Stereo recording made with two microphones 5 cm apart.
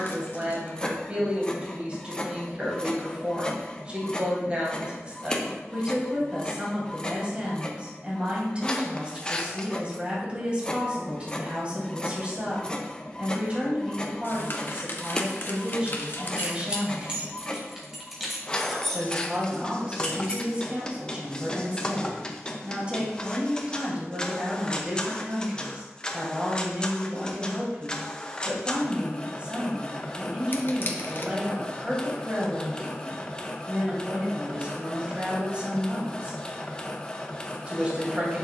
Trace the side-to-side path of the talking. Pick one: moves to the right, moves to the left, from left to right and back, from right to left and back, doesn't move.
doesn't move.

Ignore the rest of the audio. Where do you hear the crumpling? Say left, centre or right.
left.